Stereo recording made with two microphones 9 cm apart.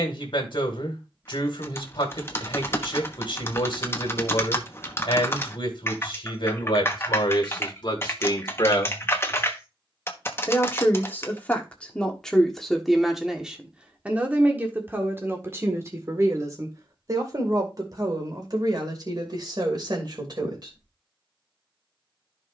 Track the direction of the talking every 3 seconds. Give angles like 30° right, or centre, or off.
60° left, 60° left, 50° left, 20° left, 10° right, 30° right, 50° right, off.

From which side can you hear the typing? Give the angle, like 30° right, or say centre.
30° left.